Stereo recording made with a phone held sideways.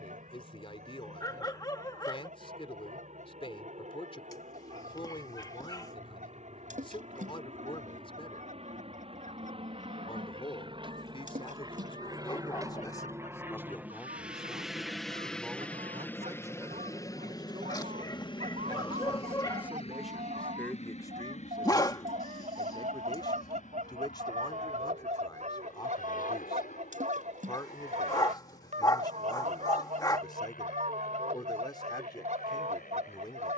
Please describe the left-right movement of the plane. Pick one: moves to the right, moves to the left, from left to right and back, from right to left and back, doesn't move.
moves to the left.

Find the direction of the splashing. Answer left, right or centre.
right.